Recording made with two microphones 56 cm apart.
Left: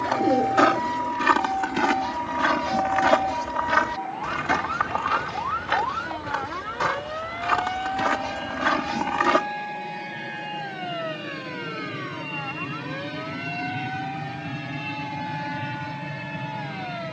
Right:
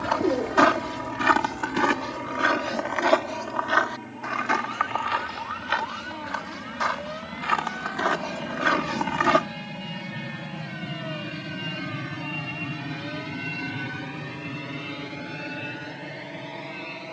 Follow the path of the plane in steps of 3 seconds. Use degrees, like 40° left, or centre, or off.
60° right, 60° right, 50° right, 30° right, centre, 30° left.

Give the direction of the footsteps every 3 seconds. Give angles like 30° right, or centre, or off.
centre, 60° left, 50° left, 10° right, off, off.